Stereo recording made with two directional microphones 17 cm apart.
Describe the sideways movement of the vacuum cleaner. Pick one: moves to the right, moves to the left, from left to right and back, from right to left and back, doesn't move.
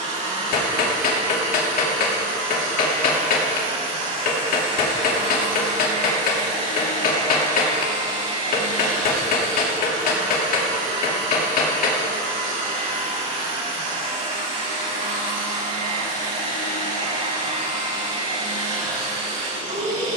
doesn't move.